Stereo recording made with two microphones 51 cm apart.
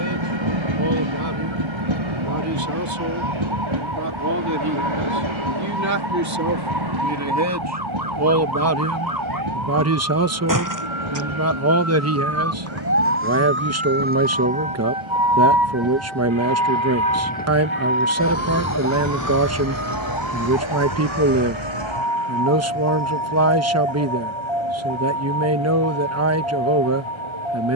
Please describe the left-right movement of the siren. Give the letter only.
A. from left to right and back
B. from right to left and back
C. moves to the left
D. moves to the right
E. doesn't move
C.